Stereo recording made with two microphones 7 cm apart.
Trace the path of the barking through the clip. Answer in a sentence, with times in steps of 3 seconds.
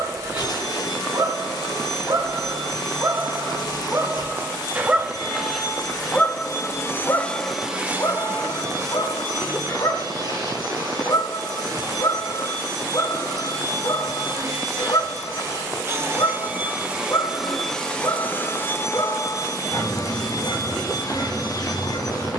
You can hear the barking on the right from 0 s and on the left from 6 s.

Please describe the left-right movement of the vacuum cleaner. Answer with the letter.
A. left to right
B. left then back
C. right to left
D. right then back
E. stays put
D.